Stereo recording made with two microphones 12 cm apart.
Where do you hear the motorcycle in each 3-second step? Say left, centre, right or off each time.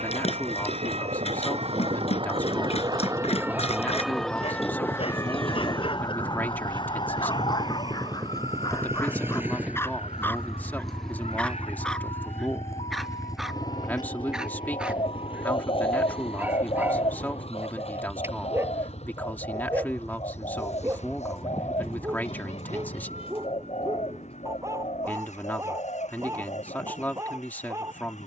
right, right, right, centre, left, left, left, left, left, left.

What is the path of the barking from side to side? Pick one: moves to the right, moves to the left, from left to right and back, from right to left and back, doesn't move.
moves to the right.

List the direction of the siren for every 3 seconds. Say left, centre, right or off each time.
right, centre, left, left, left, left, left, left, left, left.